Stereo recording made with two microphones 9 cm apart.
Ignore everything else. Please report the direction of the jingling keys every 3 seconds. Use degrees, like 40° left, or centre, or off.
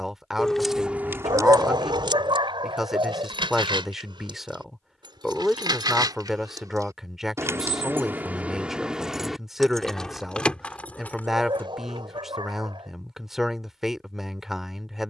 40° right, 70° right, 30° right, 10° left, off.